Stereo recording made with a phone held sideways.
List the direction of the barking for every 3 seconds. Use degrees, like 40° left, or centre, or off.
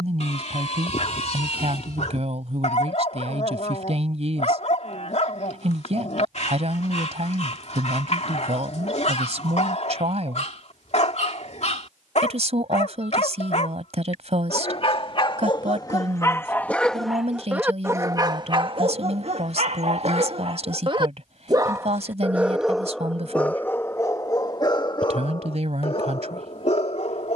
50° left, 50° left, 50° left, 50° left, 50° left, 10° left, 40° right, centre, 40° left.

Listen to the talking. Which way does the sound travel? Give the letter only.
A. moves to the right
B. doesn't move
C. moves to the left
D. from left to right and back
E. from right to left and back
B.